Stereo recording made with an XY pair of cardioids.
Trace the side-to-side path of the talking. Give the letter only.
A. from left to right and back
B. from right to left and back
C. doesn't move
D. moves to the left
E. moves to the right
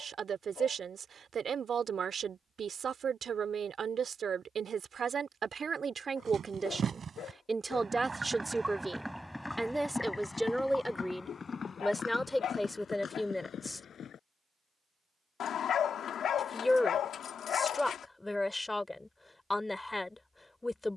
D.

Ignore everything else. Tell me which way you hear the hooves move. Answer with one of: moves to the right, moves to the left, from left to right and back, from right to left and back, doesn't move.
moves to the left.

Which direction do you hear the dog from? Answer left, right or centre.
left.